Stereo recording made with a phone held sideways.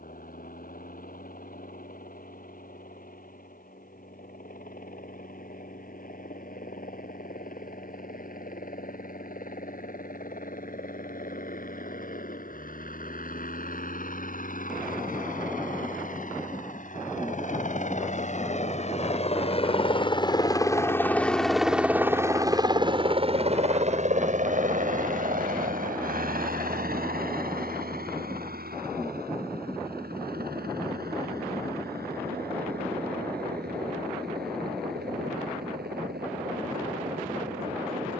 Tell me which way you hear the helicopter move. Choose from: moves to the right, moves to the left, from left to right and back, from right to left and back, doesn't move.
moves to the right.